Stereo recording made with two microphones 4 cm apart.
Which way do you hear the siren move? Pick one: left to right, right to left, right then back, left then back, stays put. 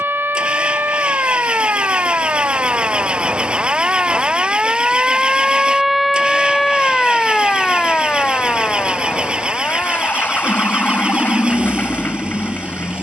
right to left.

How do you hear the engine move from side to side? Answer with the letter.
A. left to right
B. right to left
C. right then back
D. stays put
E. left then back
D.